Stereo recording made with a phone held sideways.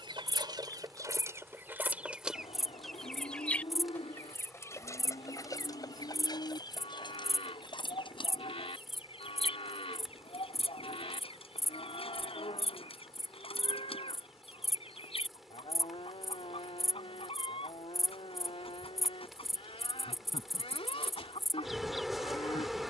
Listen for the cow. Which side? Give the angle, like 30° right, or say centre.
50° left.